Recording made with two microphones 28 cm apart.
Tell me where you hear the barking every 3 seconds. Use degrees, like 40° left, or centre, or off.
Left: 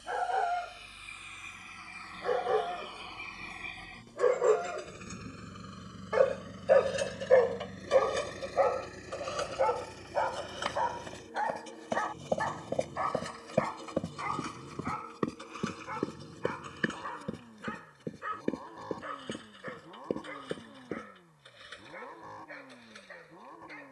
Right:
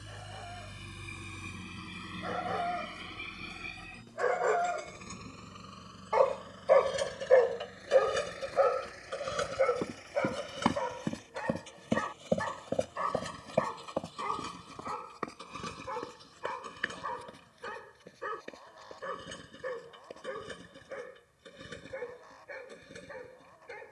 70° left, 40° left, centre, 30° right, 40° right, 50° right, 50° right, 50° right.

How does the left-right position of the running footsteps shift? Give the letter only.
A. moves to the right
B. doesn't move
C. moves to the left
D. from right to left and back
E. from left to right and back
C.